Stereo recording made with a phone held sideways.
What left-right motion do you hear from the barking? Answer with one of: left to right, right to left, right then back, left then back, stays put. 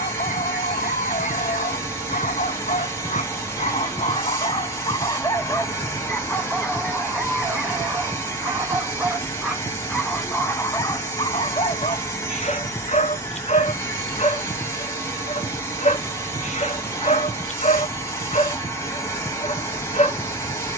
right then back.